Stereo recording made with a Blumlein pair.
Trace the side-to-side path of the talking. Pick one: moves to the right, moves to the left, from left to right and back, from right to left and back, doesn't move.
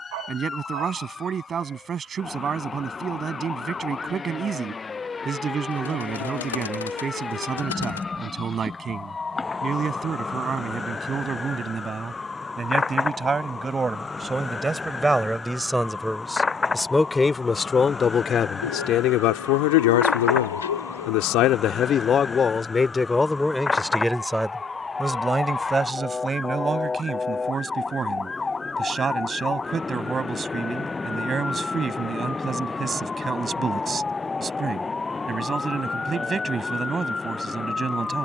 from right to left and back.